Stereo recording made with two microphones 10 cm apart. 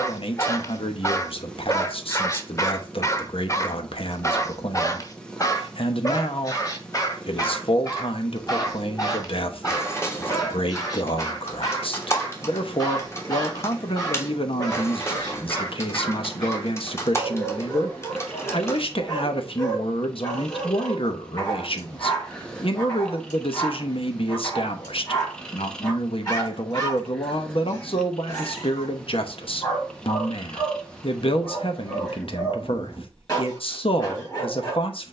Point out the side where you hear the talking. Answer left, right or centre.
left.